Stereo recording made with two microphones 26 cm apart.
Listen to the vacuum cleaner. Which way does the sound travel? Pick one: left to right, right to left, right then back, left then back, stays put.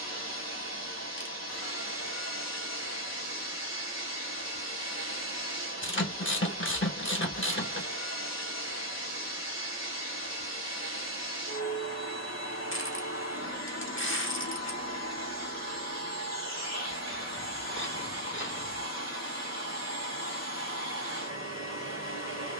stays put.